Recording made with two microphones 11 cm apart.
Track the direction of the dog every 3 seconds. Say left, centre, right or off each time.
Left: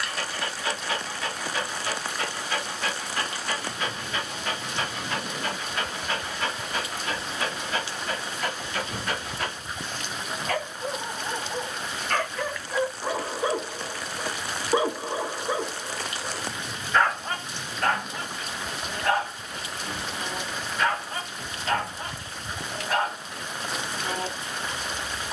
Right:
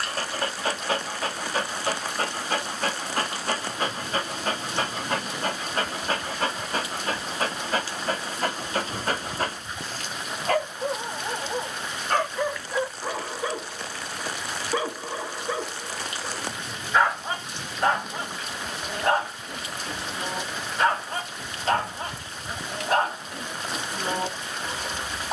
right, right, right, right, centre, centre, right, right, right.